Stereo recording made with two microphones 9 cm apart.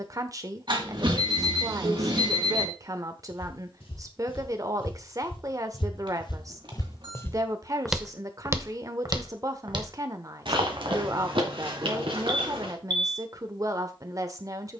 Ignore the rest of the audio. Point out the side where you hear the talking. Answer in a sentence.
You can hear the talking on the right.